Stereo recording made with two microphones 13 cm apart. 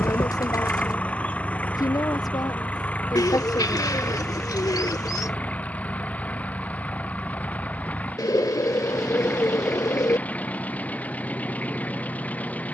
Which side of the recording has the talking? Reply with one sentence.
In this clip you hear the talking on the left.